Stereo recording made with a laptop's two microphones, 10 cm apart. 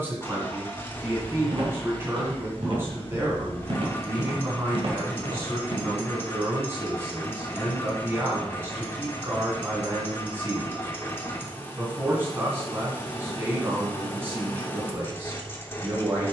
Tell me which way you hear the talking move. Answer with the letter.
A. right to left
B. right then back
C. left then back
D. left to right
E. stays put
E.